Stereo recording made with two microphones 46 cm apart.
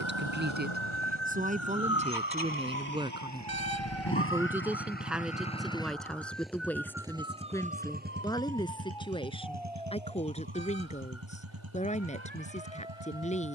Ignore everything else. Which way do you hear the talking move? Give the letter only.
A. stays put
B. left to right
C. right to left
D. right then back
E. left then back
C.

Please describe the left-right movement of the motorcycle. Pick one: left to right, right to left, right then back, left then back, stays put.
left to right.